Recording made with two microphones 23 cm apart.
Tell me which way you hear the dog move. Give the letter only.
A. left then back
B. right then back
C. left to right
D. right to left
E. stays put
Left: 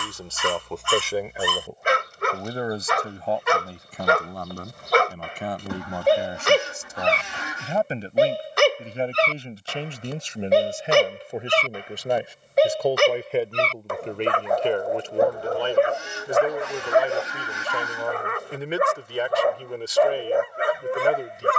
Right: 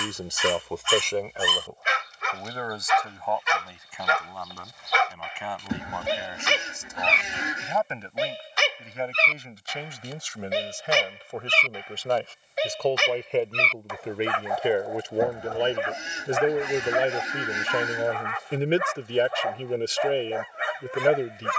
E.